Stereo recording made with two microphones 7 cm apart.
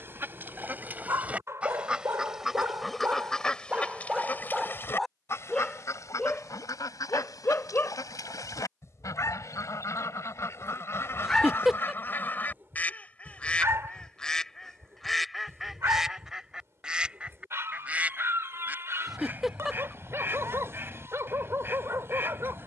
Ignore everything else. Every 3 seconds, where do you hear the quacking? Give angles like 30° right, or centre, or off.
20° right, 30° left, 60° left, 40° left, 20° left, 10° right, 30° right, 30° right.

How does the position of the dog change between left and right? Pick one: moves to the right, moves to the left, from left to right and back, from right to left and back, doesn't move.
from right to left and back.